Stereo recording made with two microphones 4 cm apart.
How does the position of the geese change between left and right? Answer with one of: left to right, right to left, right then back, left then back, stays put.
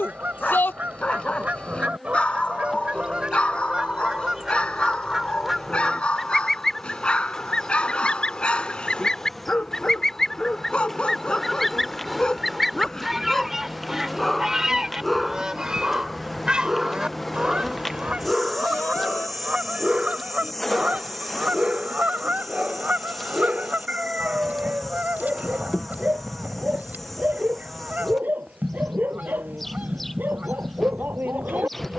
left then back.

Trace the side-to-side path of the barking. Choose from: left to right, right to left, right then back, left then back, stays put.
left to right.